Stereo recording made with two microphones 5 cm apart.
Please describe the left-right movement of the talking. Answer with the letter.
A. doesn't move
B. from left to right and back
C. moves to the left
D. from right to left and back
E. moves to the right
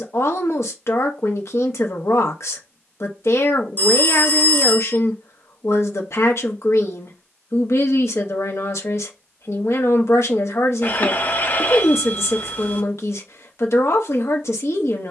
A.